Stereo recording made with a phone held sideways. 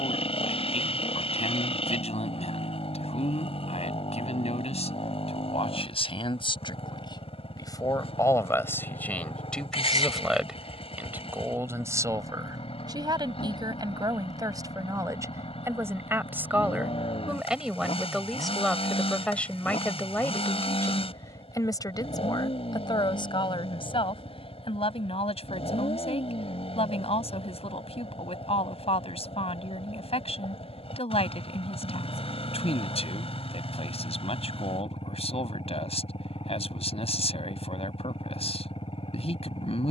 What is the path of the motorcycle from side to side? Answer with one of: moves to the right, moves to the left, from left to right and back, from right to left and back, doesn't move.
doesn't move.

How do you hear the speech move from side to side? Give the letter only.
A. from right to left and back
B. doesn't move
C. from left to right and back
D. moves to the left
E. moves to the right
C.